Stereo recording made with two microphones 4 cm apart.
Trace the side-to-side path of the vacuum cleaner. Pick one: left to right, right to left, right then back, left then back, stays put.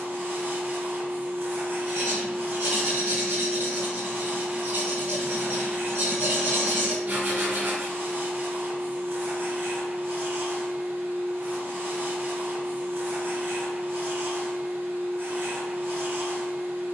stays put.